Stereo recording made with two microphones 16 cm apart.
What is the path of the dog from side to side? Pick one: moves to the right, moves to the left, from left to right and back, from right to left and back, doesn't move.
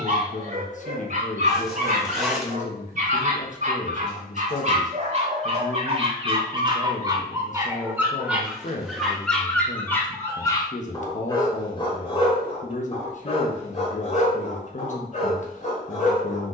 moves to the left.